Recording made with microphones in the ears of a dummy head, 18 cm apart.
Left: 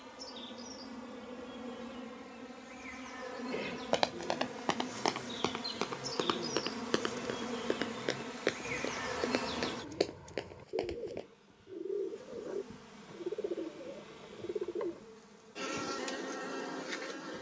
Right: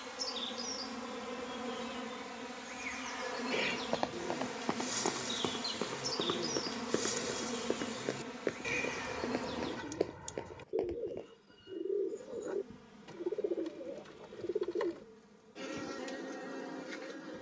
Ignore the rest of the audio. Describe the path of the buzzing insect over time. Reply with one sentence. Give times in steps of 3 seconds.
You can hear the buzzing insect on the right from 0 s, in the centre from 6 s and on the left from 9 s.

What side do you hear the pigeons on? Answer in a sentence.
You can hear the pigeons on the right.